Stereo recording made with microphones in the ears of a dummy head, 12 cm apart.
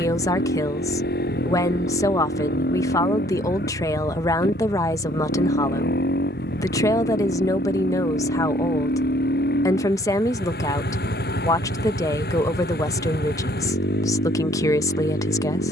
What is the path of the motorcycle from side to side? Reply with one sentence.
You can hear the motorcycle stay in one place.